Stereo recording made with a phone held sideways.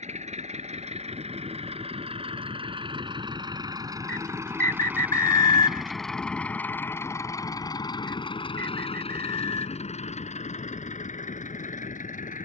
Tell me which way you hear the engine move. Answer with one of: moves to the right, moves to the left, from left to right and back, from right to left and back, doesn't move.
moves to the left.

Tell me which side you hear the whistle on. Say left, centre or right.
right.